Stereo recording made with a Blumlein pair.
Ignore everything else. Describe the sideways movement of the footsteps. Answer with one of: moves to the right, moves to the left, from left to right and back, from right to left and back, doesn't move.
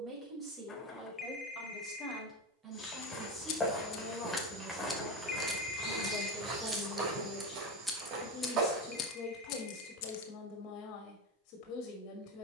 moves to the right.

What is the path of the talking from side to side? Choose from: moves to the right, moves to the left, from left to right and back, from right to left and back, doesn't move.
moves to the left.